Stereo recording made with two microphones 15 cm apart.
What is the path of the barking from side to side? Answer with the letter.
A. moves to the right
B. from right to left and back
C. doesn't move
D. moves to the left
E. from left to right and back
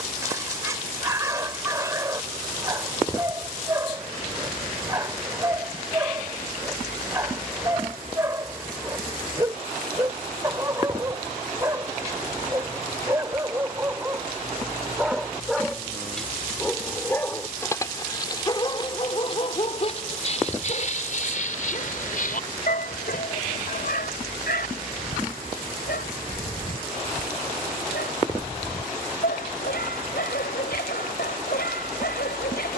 D.